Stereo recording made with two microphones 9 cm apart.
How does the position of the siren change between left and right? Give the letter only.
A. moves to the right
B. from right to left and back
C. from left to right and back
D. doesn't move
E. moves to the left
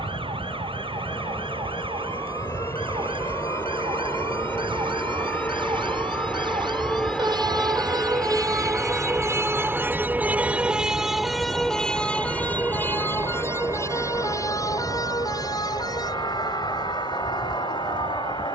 E.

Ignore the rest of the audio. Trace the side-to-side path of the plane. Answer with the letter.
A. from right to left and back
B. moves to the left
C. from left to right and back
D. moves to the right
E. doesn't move
D.